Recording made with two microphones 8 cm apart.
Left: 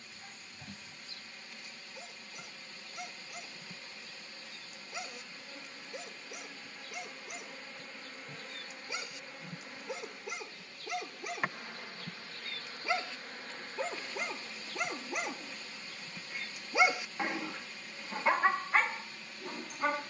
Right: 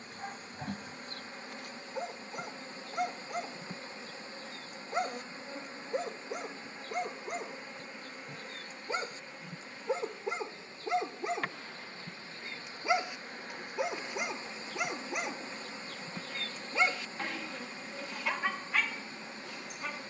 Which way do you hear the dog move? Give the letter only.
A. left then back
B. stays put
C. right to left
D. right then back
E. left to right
C.